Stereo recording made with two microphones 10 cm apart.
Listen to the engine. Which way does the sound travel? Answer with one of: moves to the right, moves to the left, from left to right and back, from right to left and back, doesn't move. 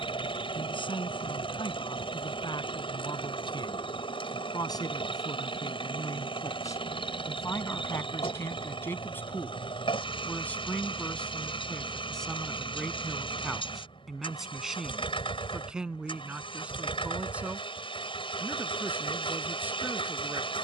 doesn't move.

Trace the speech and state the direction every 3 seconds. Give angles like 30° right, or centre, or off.
50° left, 40° left, 30° left, 10° left, centre, 10° right, 20° right.